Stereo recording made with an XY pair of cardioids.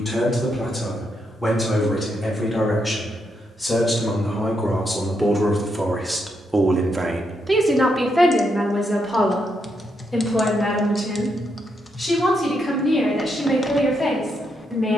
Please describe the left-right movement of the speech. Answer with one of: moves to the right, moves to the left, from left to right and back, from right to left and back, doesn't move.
from left to right and back.